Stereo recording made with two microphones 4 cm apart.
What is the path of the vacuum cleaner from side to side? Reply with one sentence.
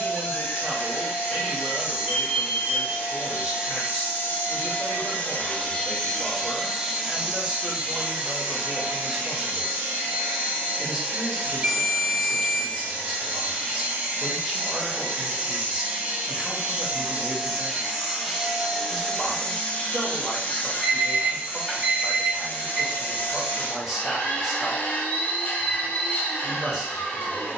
You can hear the vacuum cleaner go right and come back.